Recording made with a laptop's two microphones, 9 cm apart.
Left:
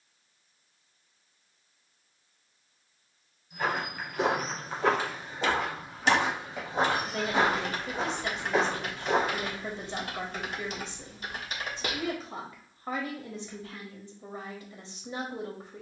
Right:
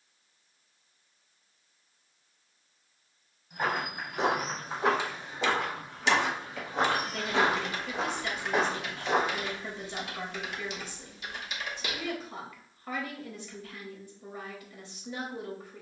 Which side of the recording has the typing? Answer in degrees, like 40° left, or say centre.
40° left.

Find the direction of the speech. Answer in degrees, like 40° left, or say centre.
30° left.